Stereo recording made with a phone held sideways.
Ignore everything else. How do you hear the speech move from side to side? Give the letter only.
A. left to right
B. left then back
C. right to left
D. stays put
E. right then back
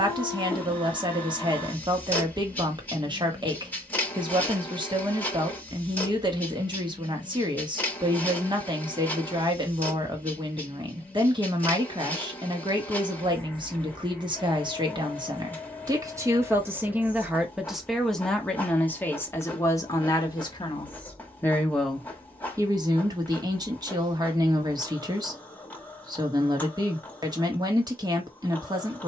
B.